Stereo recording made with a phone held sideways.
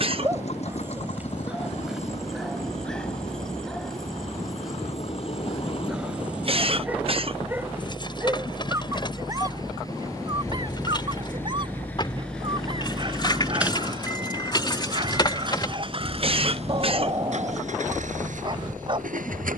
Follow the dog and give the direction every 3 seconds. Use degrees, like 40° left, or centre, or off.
10° right, centre, 10° right, 30° right, 40° right, 40° right, 40° right.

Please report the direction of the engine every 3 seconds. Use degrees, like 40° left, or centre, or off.
50° left, 40° left, 40° left, 20° left, 10° right, 50° right, 70° right.